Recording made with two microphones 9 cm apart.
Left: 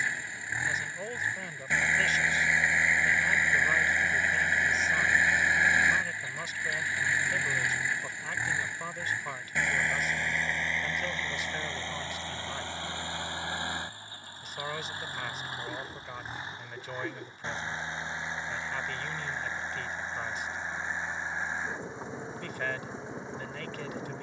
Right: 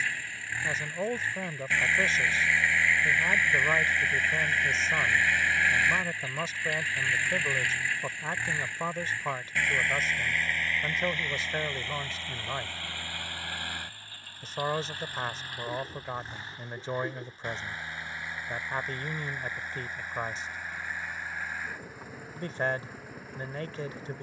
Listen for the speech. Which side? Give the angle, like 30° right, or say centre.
30° right.